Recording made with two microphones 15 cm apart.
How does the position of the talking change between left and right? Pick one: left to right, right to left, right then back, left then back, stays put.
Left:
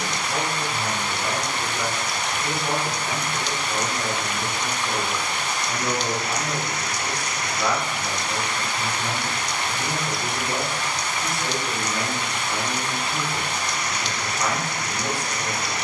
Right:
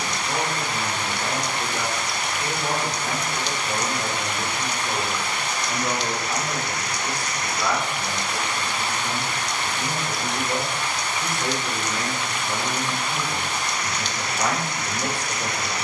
left then back.